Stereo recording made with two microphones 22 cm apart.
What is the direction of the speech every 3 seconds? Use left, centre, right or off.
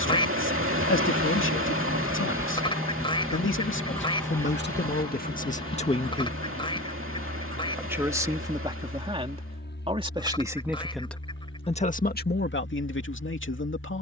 left, left, centre, centre, left.